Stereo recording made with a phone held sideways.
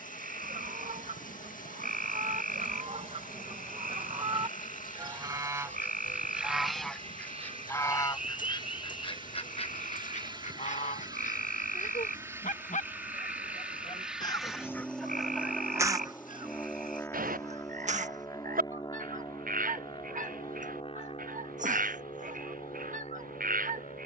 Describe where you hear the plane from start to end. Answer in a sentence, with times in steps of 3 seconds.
In this clip you hear the plane on the right from 0 s, in the centre from 12 s and on the left from 18 s.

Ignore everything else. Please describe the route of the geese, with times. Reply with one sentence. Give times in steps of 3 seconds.
You can hear the geese on the right from 0 s, in the centre from 6 s, on the left from 9 s and on the right from 15 s.